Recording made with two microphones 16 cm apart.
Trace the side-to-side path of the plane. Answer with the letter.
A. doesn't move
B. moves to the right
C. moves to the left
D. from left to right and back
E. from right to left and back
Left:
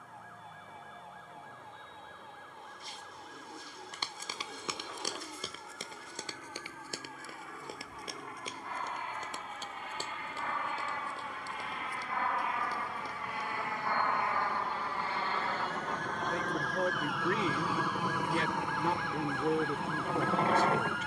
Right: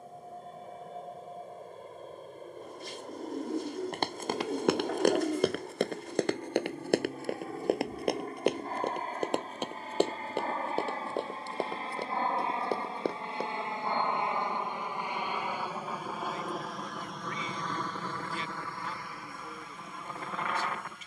C.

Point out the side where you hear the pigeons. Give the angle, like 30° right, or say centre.
70° right.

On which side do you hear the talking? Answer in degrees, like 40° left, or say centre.
70° left.